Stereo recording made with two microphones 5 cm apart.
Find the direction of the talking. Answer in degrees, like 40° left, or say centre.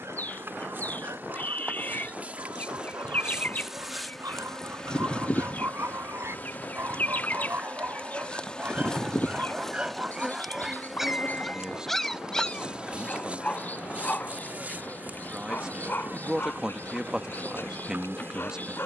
10° right.